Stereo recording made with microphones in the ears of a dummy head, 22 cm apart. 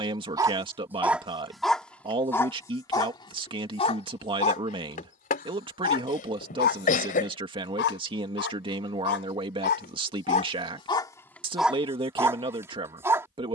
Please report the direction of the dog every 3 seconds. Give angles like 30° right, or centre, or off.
centre, 30° left, 40° left, 30° left, 10° right.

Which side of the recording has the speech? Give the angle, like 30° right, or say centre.
20° right.